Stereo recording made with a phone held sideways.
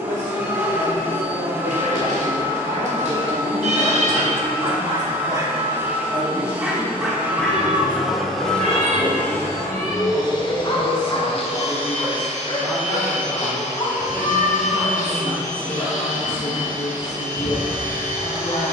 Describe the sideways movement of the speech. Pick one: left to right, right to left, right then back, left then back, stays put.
right to left.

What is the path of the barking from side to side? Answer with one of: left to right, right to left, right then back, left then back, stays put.
right to left.